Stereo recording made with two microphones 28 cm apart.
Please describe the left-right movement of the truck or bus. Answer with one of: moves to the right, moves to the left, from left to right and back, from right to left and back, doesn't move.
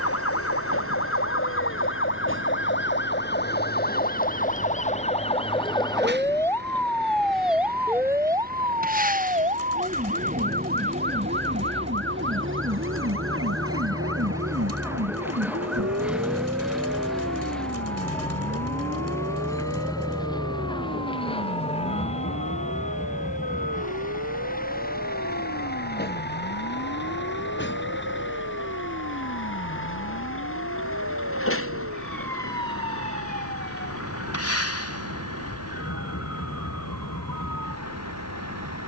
moves to the left.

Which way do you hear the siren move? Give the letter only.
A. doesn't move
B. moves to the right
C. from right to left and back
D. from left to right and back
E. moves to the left
B.